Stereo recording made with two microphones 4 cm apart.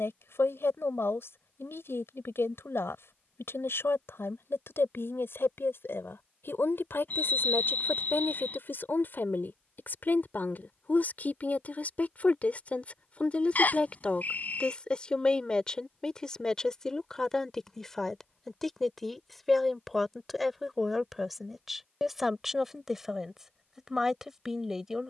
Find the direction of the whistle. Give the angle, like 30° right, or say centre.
40° left.